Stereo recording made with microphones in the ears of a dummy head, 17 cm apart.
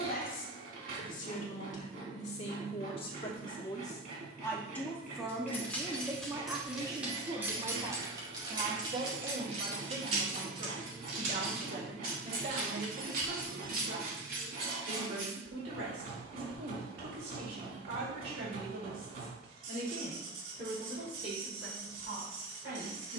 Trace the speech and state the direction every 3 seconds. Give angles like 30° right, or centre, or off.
40° left, 10° left, 30° right, 50° right, 60° right, 70° right, 70° right, 80° right.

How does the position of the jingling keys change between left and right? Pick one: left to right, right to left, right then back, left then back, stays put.
left to right.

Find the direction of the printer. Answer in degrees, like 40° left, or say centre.
50° right.